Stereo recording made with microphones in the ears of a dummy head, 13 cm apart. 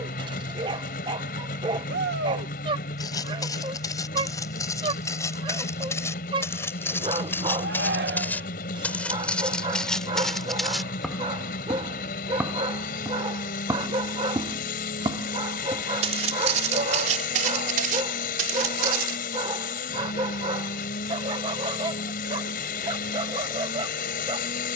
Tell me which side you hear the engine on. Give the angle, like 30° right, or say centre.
60° left.